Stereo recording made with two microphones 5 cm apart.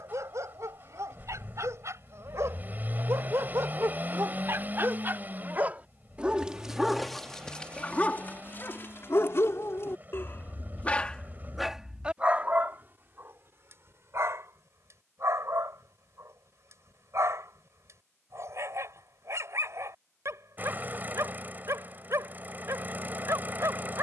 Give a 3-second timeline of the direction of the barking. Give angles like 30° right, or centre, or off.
60° right, 50° right, 10° left, 30° left, 40° right, 60° right, 60° right, 60° right.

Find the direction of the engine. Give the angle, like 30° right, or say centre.
30° right.